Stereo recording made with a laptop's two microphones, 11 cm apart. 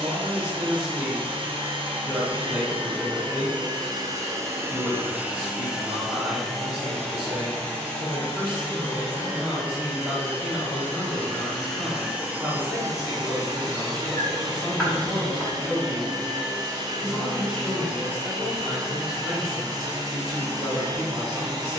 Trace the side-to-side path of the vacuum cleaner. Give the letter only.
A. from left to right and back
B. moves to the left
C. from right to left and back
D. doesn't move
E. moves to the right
C.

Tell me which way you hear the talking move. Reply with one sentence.
You can hear the talking stay put.